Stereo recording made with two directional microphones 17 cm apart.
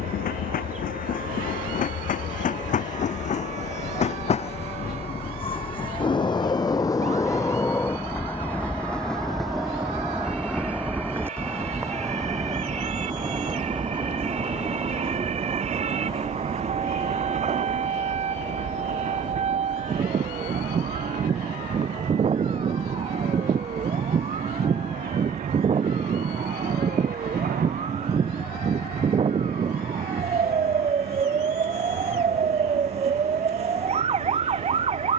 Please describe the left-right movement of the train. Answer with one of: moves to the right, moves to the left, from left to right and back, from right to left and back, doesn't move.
moves to the right.